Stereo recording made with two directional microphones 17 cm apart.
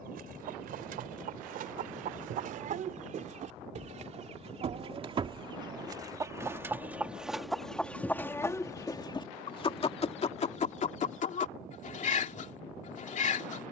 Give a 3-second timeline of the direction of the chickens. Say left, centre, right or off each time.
right, right, centre, left, left.